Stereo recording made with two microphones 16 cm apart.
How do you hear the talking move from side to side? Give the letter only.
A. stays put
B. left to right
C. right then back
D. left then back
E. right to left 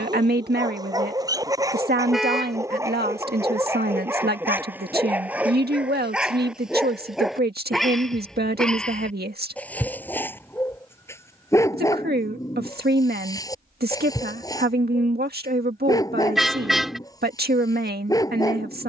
A.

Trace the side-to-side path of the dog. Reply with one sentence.
You can hear the dog go from the right side to the left.